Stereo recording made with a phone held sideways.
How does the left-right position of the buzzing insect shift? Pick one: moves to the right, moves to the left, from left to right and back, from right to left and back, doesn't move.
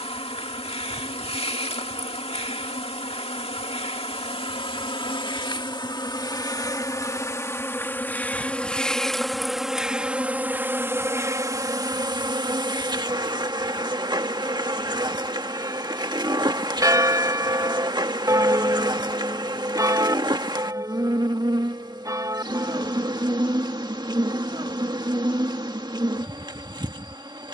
moves to the right.